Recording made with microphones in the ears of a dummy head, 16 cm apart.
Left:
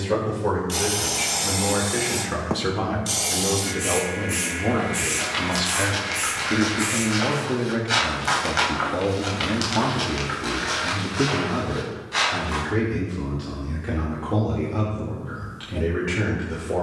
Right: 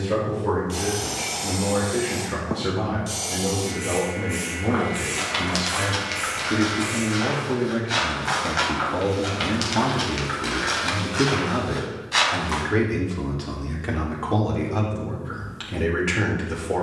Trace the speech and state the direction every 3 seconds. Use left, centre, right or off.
left, left, left, centre, right, right.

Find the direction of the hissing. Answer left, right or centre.
left.